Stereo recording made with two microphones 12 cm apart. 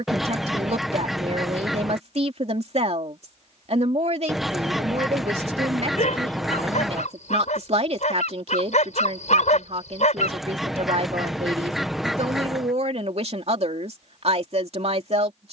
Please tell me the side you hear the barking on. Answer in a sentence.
You can hear the barking on the left.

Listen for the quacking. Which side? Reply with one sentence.
In this clip you hear the quacking in the centre.